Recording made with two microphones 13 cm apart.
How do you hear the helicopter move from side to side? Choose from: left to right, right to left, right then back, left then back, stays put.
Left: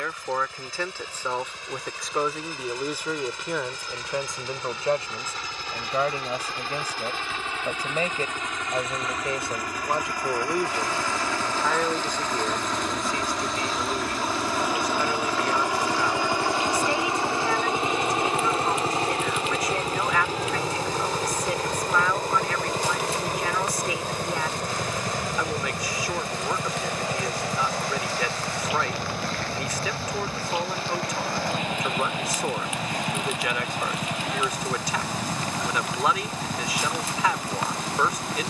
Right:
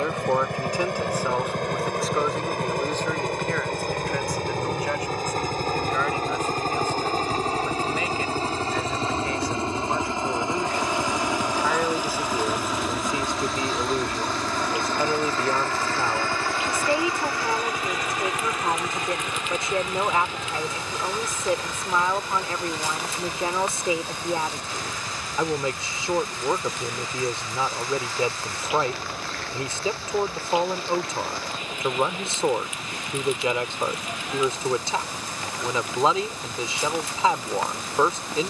right to left.